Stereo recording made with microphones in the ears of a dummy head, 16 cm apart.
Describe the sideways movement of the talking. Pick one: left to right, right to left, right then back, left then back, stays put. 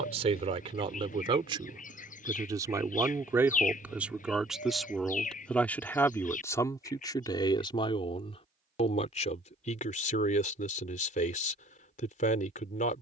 right to left.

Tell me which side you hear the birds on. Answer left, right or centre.
left.